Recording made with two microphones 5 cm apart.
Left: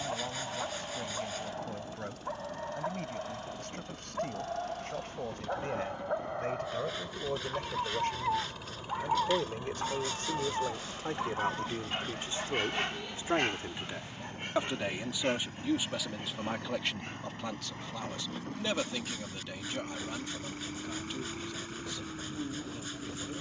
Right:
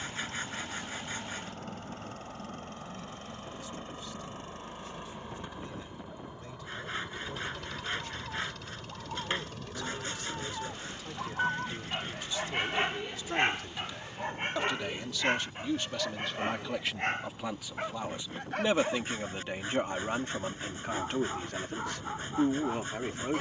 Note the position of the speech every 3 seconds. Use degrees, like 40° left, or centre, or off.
60° left, 60° left, 50° left, 40° left, 30° left, centre, 30° right, 60° right.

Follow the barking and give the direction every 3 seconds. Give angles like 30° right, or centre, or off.
70° left, 70° left, 60° left, 20° left, 30° right, 60° right, 70° right, 70° right.